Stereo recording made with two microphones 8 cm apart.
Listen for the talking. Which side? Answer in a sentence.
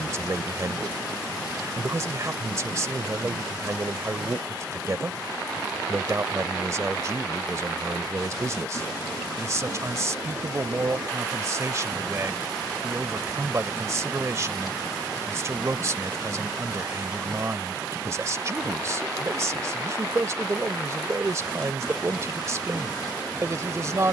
You can hear the talking on the right.